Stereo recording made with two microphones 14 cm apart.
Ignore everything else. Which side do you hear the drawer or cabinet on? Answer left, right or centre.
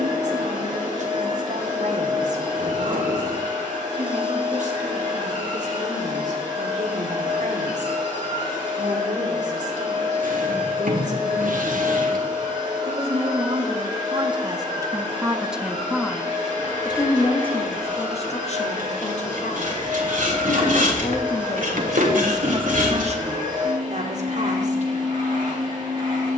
right.